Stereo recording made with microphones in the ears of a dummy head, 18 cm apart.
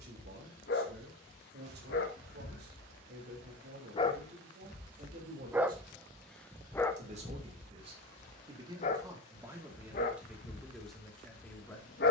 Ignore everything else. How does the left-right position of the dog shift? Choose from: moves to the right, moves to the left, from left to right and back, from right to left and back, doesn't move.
from left to right and back.